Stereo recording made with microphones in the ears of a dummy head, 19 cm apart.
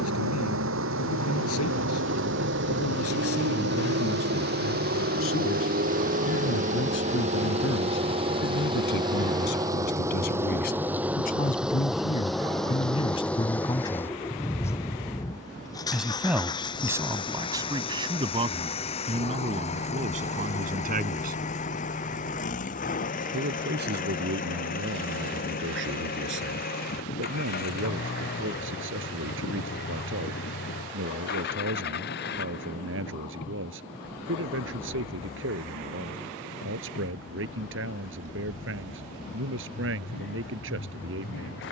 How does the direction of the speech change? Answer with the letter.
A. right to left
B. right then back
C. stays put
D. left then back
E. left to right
E.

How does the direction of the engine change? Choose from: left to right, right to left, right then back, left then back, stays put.
right to left.